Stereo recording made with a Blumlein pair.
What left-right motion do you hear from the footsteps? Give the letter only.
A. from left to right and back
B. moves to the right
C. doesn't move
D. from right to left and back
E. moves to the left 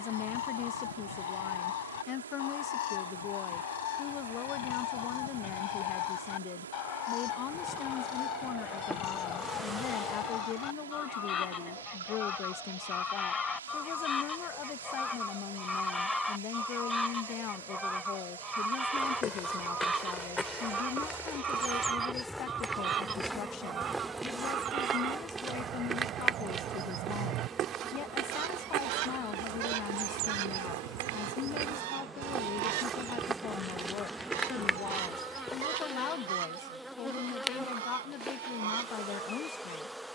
A.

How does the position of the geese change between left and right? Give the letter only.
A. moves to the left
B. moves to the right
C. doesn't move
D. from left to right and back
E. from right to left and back
B.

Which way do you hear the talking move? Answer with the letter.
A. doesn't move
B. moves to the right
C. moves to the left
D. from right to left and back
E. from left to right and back
A.